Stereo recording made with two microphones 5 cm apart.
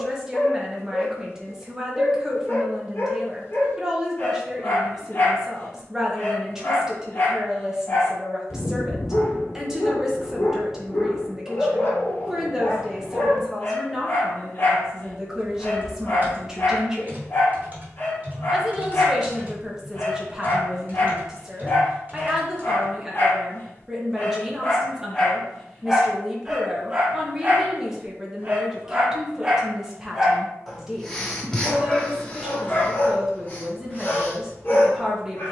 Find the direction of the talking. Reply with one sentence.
In this clip you hear the talking in the centre.